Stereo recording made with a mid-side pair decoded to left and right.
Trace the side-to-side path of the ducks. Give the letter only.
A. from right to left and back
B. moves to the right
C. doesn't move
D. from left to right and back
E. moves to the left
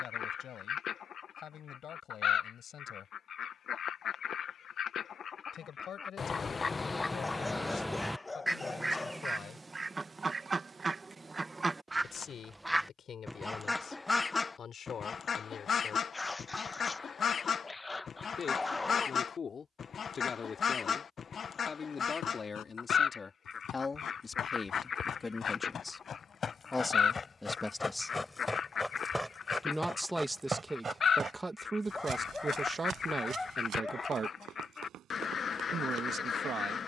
D.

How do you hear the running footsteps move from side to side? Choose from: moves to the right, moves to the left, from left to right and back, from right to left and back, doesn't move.
moves to the right.